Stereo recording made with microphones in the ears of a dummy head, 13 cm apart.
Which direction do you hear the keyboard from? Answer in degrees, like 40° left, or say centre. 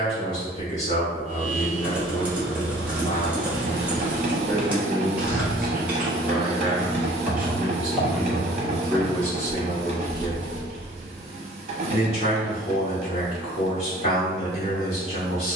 10° right.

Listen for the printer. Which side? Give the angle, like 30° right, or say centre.
40° right.